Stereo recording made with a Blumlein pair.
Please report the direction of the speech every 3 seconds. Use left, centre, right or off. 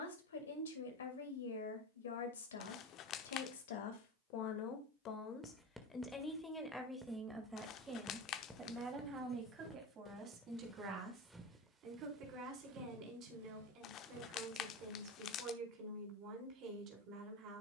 left, left, centre, right, right, right.